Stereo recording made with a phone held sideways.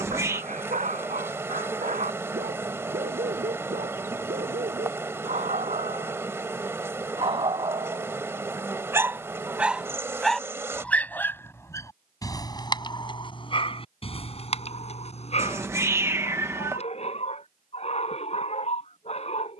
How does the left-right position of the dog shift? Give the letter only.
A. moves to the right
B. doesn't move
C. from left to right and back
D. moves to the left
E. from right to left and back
D.